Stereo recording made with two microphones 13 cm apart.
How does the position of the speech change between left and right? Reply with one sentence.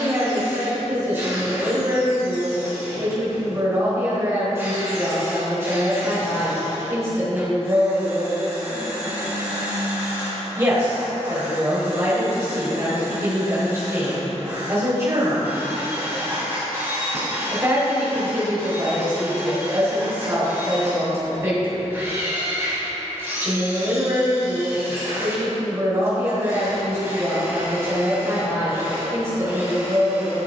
You can hear the speech stay in one place.